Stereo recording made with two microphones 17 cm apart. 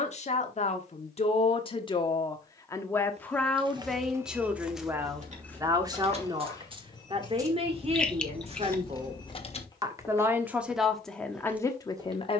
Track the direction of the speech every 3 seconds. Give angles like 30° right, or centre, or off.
30° left, 10° right, 30° right, centre.